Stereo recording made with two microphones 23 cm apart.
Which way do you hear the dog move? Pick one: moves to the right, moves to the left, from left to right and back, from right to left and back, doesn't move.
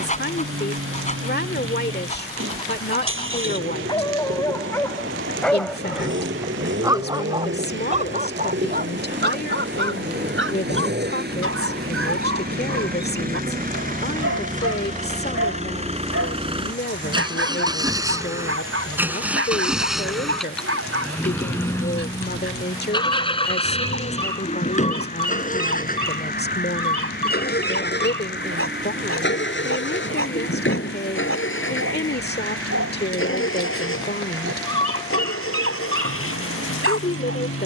moves to the right.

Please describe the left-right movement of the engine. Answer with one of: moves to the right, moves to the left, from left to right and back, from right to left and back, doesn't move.
moves to the left.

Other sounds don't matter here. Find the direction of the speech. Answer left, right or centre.
left.